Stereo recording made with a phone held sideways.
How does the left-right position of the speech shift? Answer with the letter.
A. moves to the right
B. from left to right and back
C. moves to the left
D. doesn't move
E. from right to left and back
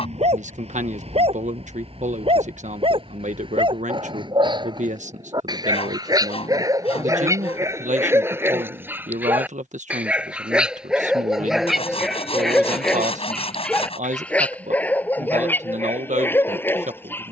D.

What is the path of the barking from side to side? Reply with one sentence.
In this clip you hear the barking travel towards the left.